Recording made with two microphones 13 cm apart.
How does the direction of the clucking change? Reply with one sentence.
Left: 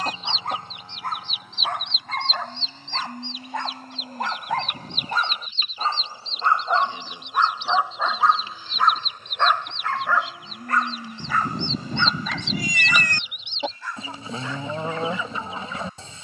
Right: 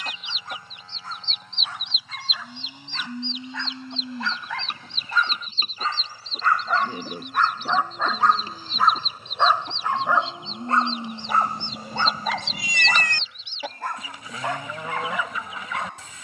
In this clip you hear the clucking move from left to right and back again.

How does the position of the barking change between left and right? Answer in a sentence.
In this clip you hear the barking travel towards the right.